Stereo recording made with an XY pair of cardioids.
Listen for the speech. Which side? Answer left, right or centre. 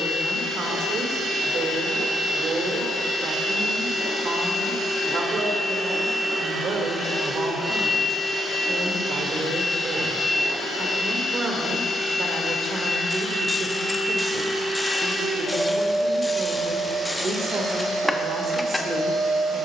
right.